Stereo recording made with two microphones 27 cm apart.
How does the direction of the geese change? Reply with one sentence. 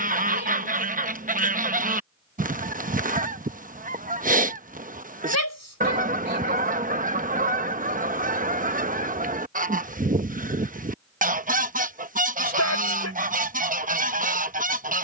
You can hear the geese stay in one place.